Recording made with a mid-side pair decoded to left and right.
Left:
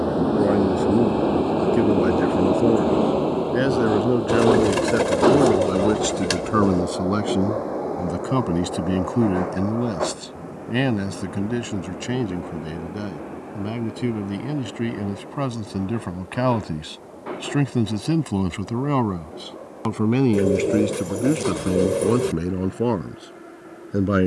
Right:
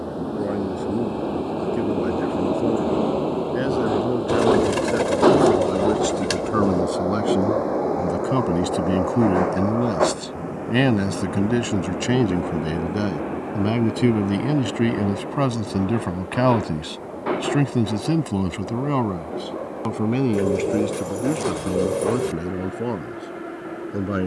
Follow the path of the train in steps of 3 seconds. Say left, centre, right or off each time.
left, centre, right, right, right, right, right, right.